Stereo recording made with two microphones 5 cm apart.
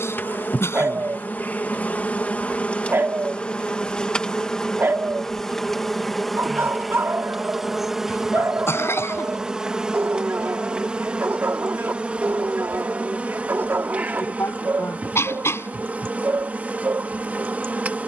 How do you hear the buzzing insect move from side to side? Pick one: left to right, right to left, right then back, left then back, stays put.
left to right.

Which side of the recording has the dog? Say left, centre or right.
right.